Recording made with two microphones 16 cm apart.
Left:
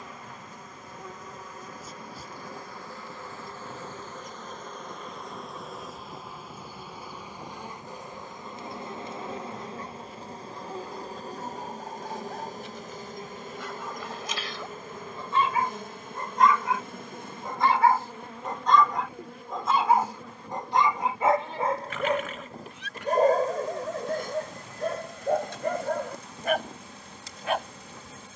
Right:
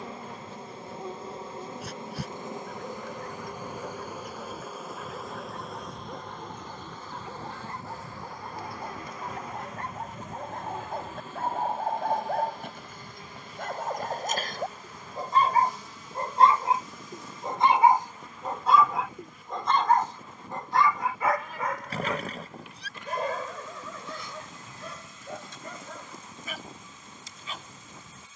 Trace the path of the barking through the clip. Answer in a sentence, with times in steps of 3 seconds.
You can hear the barking on the right from 0 s, in the centre from 18 s and on the left from 21 s.